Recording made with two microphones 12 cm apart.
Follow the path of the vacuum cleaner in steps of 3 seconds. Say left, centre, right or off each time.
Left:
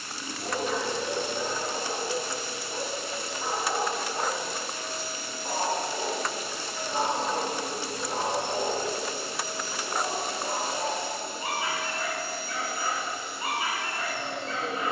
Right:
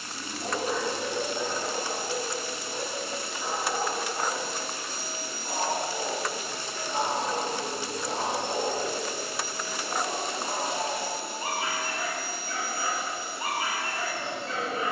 right, right, left, centre, right.